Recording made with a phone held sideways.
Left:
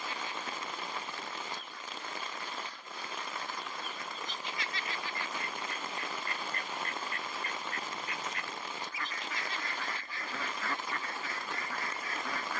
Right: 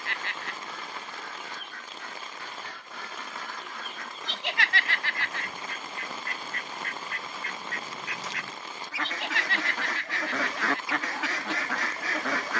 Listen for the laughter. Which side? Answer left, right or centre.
right.